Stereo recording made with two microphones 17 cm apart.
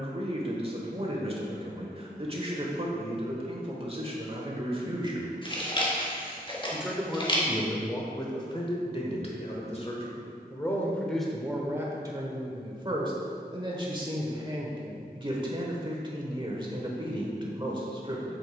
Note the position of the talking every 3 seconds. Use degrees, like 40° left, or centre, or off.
30° right, 30° right, 10° left, 20° left, 30° right, 30° right.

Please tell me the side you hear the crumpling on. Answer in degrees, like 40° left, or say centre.
30° left.